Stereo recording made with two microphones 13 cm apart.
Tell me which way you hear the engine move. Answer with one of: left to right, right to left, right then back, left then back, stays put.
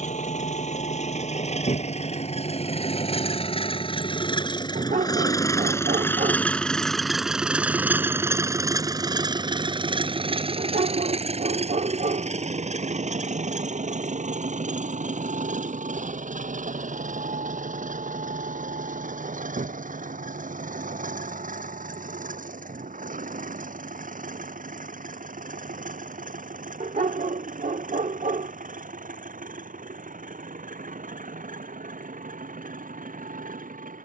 left to right.